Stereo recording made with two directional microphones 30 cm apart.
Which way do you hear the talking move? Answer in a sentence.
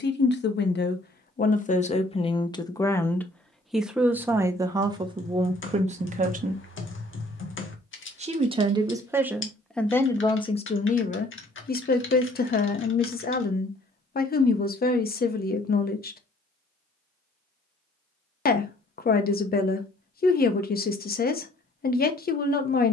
In this clip you hear the talking move from left to right and back again.